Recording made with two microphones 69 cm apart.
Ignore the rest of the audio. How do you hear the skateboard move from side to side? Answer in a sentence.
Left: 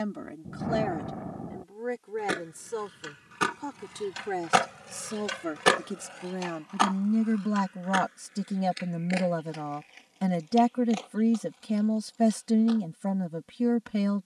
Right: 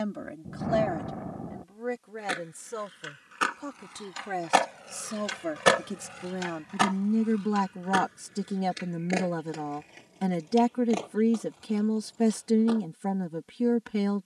In this clip you hear the skateboard move to the right.